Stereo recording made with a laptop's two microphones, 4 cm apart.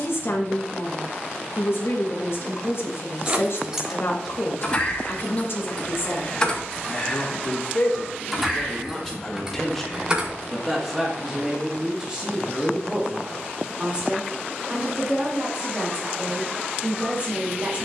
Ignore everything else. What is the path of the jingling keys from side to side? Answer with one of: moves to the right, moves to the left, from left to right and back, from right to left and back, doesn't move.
from right to left and back.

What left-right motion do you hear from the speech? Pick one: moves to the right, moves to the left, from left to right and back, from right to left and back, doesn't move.
moves to the right.